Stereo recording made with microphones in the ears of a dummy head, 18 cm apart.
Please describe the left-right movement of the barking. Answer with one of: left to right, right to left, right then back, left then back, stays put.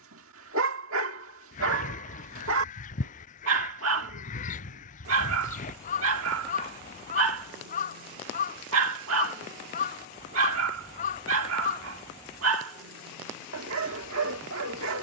stays put.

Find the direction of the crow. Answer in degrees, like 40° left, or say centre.
40° left.